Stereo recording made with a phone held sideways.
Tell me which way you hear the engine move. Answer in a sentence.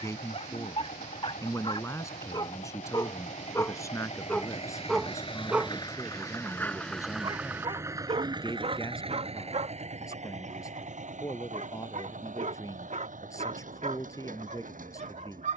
In this clip you hear the engine go from the left side to the right.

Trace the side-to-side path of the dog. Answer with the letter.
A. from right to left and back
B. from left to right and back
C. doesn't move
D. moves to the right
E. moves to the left
D.